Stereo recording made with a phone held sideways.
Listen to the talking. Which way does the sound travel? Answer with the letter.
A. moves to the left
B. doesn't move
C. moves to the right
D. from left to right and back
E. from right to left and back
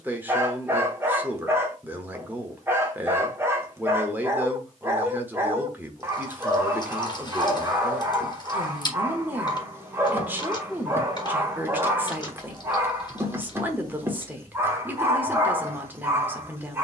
B.